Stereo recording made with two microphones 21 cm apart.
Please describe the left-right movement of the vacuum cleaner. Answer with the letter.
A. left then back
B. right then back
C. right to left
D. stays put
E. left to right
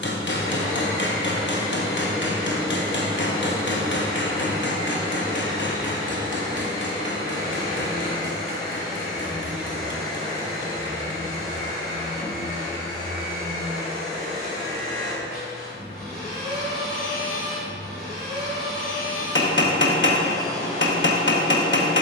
D.